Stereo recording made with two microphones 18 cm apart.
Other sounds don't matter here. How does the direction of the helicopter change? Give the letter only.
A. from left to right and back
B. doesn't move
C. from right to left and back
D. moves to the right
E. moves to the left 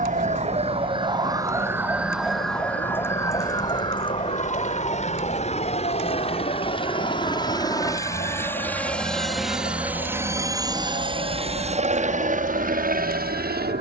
D.